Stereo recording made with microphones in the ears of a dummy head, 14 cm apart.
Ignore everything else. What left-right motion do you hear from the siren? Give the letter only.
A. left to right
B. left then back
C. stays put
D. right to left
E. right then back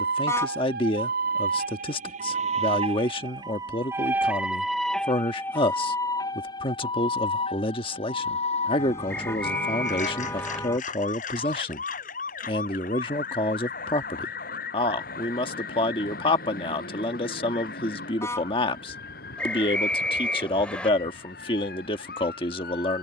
D.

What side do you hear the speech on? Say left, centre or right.
left.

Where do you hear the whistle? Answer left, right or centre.
centre.